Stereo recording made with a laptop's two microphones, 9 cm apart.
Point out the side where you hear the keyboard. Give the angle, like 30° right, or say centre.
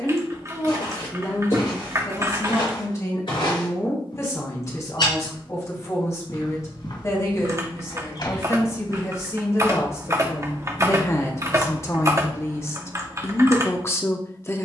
30° right.